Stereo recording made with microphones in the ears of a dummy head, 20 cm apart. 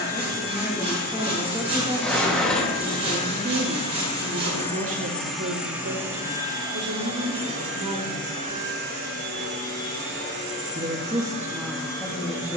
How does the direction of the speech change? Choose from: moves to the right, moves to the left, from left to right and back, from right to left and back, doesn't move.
from left to right and back.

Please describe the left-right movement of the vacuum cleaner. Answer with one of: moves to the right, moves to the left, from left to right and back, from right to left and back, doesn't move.
moves to the right.